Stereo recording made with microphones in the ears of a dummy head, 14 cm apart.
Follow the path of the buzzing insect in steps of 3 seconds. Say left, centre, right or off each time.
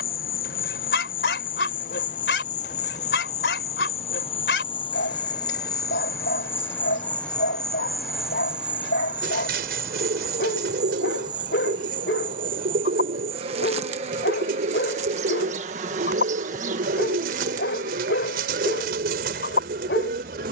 left, left, centre, right, right, right, right.